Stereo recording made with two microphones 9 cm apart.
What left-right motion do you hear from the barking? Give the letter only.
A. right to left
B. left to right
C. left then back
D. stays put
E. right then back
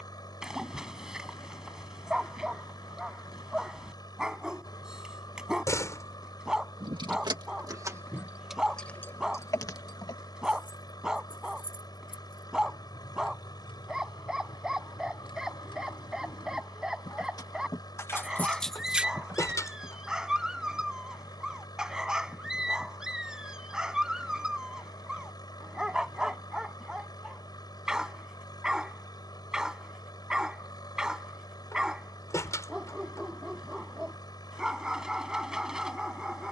D.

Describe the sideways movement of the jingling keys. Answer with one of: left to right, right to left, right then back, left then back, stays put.
left then back.